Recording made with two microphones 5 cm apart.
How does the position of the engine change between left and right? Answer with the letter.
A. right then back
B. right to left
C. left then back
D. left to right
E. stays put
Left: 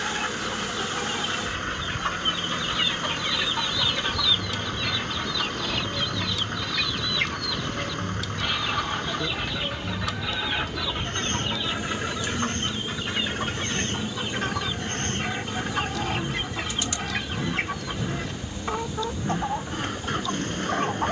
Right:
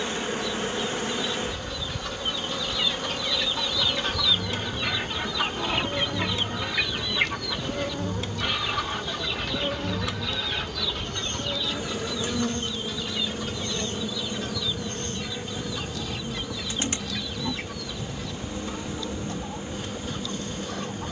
E.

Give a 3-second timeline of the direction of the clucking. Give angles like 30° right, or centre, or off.
40° left, 10° right, 10° right, 20° left, 40° left, 50° left, 50° left.